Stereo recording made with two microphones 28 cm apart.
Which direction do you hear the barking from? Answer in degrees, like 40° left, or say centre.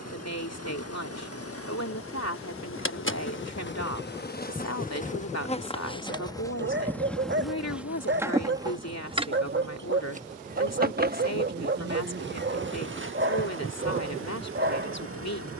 40° right.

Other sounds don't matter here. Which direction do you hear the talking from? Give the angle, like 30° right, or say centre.
70° left.